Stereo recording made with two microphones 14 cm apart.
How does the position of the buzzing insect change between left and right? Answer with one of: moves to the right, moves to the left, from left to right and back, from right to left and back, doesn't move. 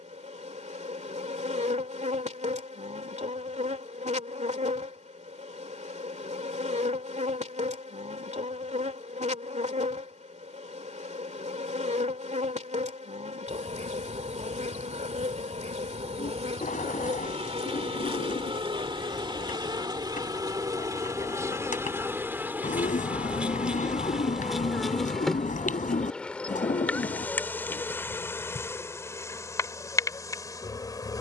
moves to the left.